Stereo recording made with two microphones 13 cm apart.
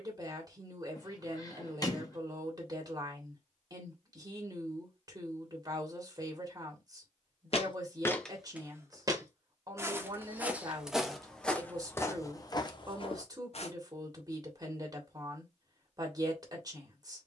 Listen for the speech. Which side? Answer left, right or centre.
right.